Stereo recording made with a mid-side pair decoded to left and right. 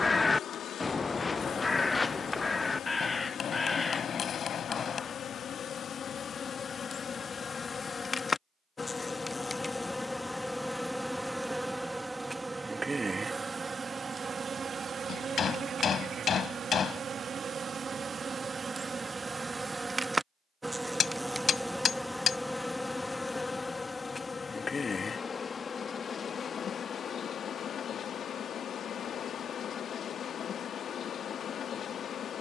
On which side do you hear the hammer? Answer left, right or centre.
left.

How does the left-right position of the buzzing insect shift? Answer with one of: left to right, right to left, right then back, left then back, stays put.
right then back.